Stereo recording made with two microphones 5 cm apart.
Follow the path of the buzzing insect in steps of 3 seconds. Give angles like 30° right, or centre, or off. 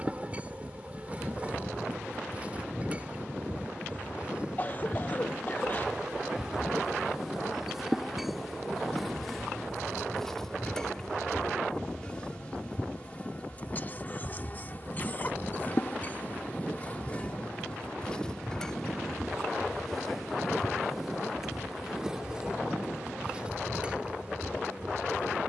20° right, 20° right, 10° right, 10° left, 30° left, 30° left, 10° left, 10° right, 20° right.